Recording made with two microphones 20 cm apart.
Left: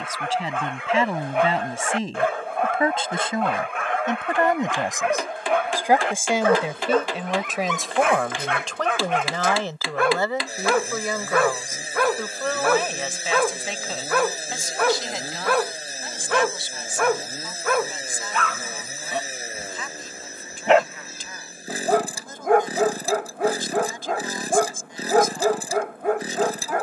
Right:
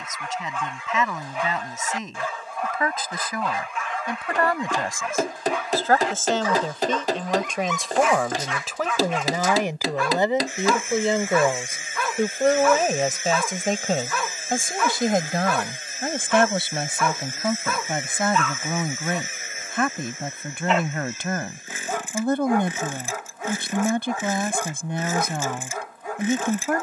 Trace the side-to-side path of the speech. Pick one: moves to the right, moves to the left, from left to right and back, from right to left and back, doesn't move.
moves to the right.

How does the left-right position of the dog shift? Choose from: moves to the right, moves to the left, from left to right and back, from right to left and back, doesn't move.
doesn't move.